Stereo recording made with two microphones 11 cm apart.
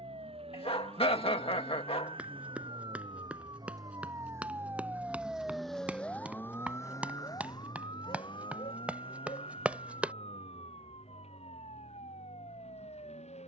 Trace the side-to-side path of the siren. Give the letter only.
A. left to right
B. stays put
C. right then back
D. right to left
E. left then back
D.